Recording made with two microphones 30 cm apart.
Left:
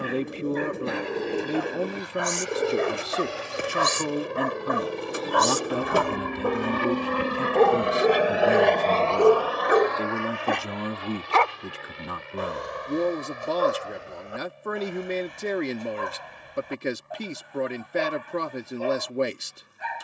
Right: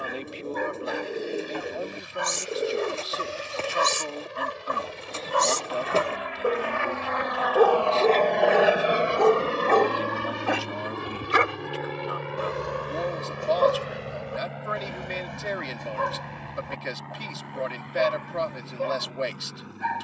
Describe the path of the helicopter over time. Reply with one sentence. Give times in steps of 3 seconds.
In this clip you hear the helicopter on the left from 0 s and on the right from 9 s.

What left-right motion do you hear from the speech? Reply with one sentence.
In this clip you hear the speech stay in one place.